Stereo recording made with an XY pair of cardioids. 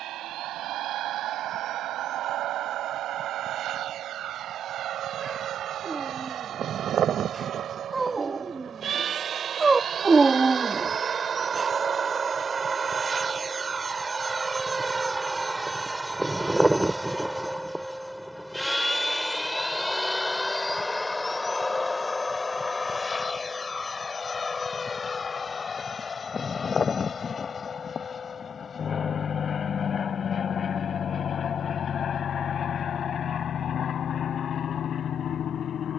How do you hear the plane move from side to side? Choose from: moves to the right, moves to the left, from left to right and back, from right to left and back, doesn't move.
moves to the left.